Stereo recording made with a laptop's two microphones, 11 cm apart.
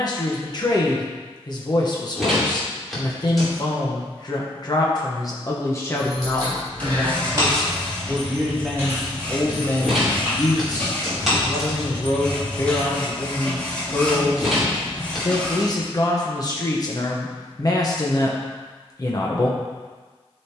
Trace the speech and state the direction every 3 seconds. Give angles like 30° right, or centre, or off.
40° left, 40° left, 10° left, 30° left, 40° left, 40° left, 40° left.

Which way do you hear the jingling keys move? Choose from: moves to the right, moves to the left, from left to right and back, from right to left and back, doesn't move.
moves to the left.